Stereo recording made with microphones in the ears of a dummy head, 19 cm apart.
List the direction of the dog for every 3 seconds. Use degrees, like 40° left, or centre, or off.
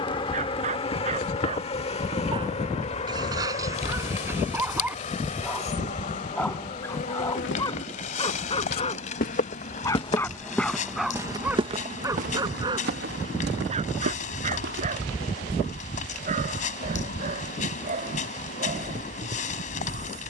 30° right, 10° right, 20° left, centre, 30° right, 40° right, 40° right.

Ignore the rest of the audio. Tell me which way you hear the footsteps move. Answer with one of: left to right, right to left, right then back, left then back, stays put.
left to right.